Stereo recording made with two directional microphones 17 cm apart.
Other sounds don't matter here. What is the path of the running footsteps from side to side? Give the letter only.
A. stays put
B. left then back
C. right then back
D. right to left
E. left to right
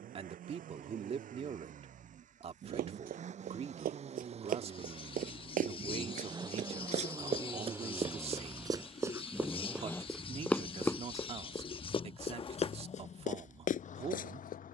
D.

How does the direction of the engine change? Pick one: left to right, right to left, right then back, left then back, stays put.
right to left.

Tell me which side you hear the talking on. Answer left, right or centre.
right.